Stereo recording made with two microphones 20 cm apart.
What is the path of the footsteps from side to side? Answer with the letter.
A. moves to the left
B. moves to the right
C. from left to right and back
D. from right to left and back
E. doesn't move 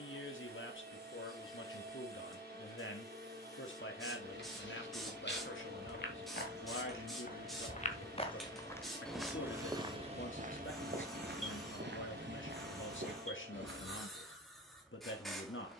B.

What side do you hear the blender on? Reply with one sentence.
In this clip you hear the blender on the right.